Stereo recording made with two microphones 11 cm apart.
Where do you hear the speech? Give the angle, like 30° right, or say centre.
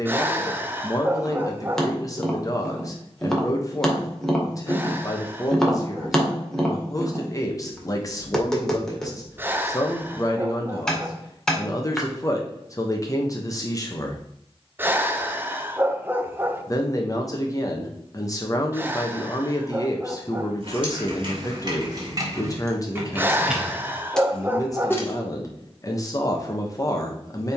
30° left.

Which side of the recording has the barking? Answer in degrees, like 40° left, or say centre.
20° right.